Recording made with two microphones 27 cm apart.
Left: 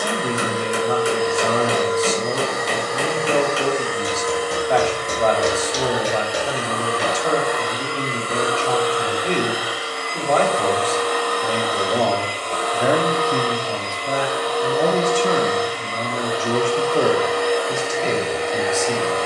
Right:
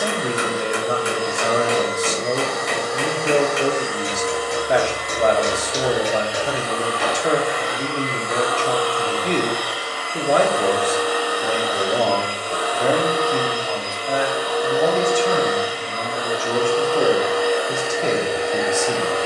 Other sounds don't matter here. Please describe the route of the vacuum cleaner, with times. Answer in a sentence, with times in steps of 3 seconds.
In this clip you hear the vacuum cleaner on the left from 0 s and in the centre from 9 s.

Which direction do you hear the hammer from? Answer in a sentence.
You can hear the hammer on the left.